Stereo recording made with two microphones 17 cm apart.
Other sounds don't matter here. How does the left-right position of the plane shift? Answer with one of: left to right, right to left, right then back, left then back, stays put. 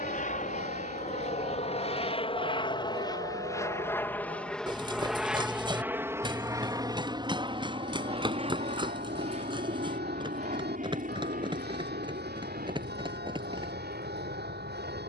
left to right.